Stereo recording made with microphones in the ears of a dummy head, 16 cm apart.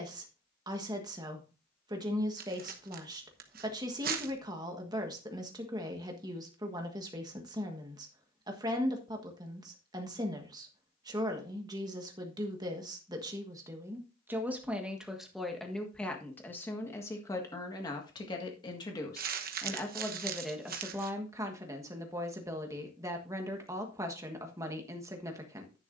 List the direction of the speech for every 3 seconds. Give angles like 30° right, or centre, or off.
20° right, 20° right, 20° right, 20° right, 20° right, 10° left, 10° left, 20° right, 20° right.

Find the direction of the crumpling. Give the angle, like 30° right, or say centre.
50° right.